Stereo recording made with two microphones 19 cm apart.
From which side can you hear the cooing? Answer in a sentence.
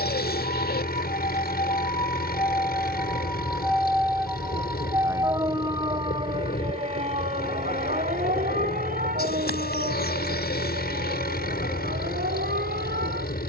You can hear the cooing on the left.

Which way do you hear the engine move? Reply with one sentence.
In this clip you hear the engine stay put.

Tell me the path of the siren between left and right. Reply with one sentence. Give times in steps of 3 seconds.
In this clip you hear the siren on the left from 0 s, in the centre from 3 s and on the right from 6 s.